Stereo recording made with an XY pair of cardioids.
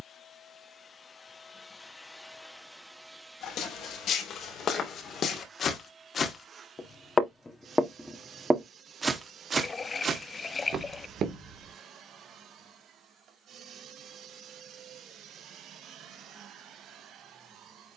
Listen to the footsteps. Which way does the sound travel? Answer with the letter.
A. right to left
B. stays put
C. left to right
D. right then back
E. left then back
C.